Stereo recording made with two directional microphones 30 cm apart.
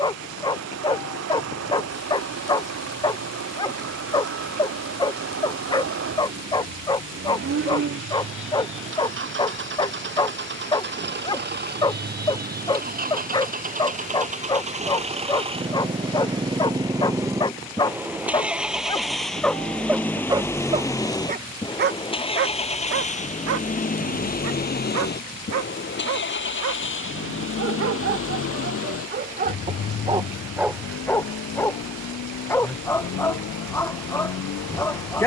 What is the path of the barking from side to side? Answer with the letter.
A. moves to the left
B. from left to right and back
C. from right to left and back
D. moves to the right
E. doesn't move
B.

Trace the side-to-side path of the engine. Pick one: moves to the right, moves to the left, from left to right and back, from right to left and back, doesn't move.
moves to the left.